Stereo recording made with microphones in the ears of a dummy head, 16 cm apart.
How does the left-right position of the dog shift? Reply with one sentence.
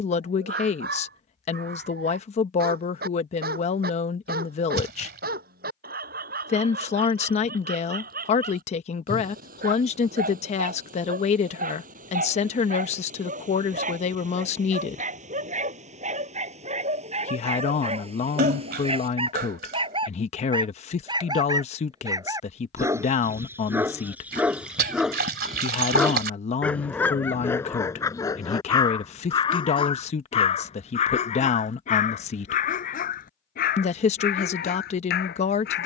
You can hear the dog go from the right side to the left.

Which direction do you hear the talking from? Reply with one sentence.
You can hear the talking on the left.